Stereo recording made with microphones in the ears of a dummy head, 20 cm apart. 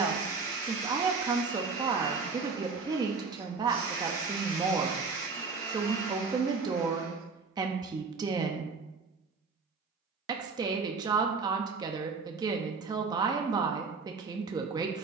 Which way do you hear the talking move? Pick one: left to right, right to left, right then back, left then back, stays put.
stays put.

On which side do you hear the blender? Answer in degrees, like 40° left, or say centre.
20° left.